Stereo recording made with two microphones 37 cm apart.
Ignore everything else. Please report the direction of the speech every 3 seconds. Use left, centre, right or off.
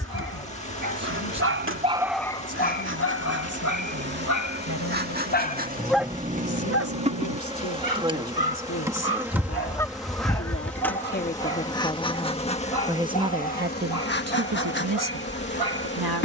left, left, left, left, right, right.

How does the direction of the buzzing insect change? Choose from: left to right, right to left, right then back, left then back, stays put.
right to left.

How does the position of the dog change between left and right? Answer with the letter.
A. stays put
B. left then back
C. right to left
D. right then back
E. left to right
B.